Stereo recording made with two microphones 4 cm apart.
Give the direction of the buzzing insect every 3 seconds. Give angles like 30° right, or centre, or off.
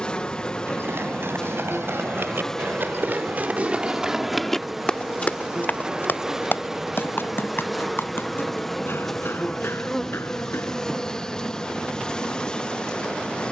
20° left, centre, centre, 10° left, 20° left.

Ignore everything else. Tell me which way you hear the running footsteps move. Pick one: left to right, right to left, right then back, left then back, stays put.
right to left.